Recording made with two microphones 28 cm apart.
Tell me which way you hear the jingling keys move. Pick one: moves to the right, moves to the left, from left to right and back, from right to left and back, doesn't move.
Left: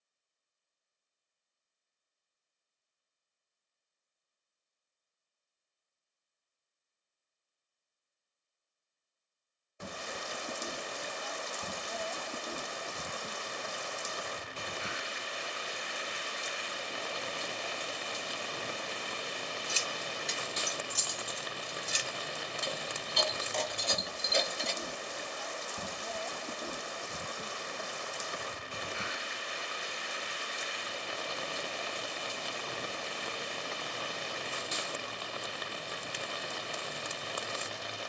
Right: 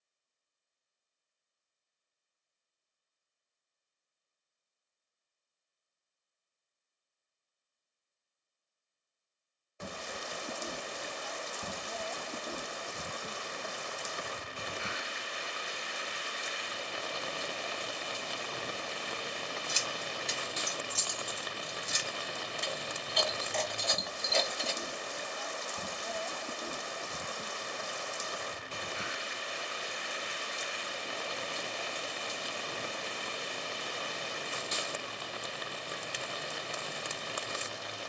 from right to left and back.